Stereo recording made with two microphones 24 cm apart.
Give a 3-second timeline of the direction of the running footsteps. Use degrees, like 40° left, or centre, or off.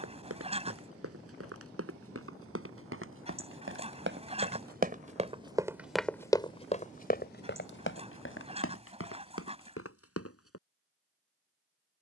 70° right, 40° right, 40° left, 70° left.